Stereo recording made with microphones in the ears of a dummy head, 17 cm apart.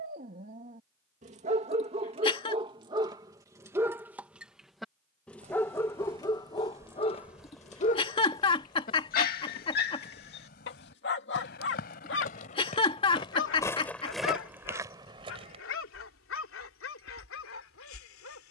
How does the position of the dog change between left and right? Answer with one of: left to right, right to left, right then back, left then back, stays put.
right to left.